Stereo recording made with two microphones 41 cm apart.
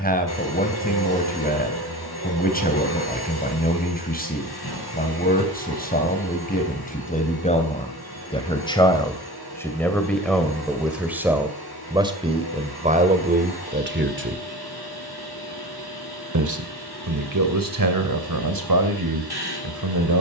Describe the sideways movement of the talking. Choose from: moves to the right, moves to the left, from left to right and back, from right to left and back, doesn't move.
moves to the right.